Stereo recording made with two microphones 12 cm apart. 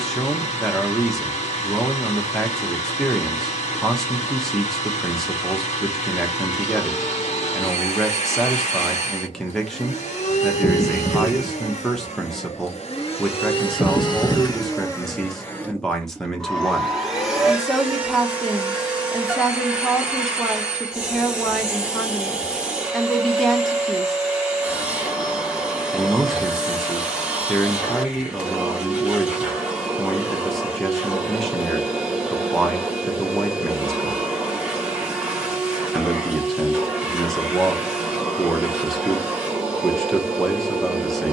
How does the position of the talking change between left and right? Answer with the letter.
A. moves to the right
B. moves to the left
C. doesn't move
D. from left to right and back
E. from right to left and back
C.